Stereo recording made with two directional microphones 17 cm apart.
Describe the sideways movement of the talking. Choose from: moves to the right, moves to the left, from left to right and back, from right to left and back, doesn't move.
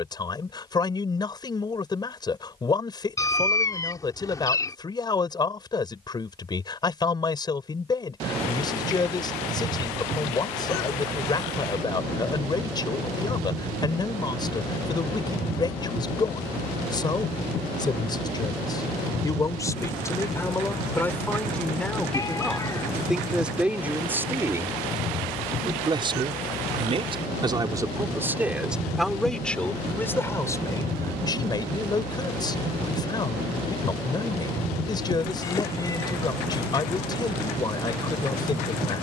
from left to right and back.